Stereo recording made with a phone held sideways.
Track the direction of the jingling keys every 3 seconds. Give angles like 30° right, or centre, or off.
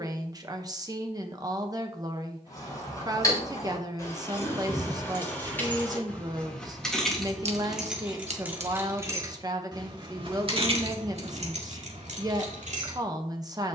30° left, 20° left, centre, 50° right, 70° right.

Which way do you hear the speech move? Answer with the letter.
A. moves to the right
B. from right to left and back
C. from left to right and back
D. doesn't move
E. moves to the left
D.